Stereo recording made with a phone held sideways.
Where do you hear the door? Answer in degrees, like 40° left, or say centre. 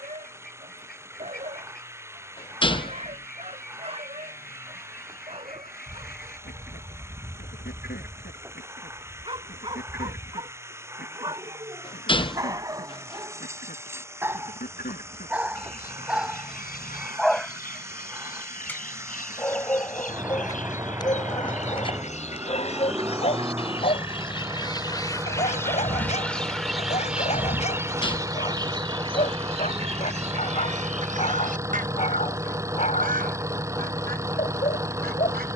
30° left.